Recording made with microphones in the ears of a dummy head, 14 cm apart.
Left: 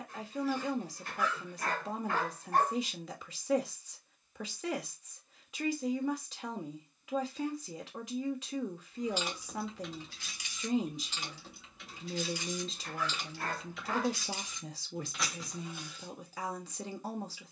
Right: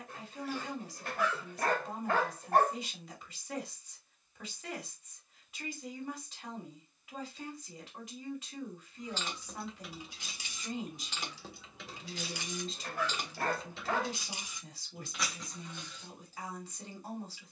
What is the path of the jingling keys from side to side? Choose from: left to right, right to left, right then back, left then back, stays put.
right then back.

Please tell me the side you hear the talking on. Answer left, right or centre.
left.